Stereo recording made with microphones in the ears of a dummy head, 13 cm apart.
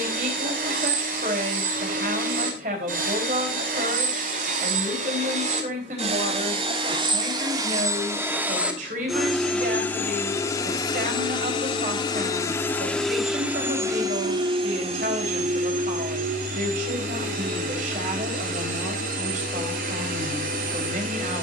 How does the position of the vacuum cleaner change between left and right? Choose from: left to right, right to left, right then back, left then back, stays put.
left then back.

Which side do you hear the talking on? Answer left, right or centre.
right.